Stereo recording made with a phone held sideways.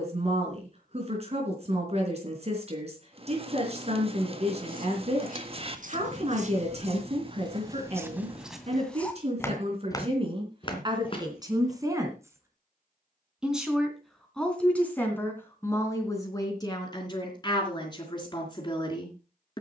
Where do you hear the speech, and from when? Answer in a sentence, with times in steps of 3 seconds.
In this clip you hear the speech on the right from 0 s, in the centre from 12 s and on the left from 15 s.